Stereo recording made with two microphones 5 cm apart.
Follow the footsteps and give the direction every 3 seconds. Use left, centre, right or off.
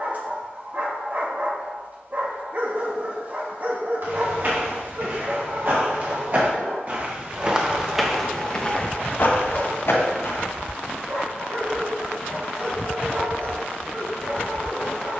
off, right, centre, left, off.